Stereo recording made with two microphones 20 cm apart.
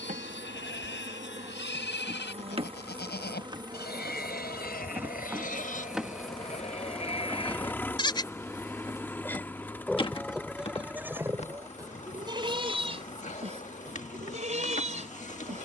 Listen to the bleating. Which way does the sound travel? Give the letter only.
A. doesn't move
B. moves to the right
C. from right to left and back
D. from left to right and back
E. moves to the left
B.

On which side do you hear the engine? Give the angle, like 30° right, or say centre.
10° left.